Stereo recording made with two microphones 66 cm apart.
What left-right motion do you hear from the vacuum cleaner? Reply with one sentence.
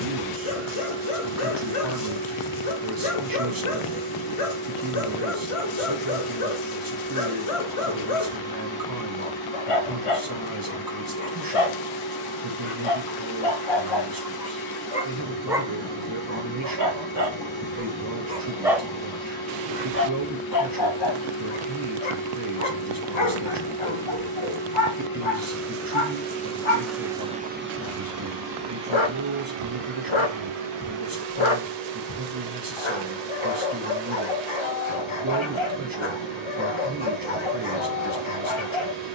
You can hear the vacuum cleaner travel towards the right.